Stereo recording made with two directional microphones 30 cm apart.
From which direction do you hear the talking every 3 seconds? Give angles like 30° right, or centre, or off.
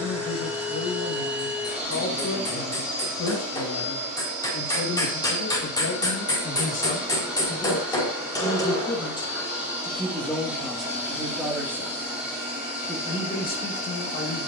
50° left, 50° left, 30° left, centre, 30° left.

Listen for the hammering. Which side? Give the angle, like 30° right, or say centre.
10° left.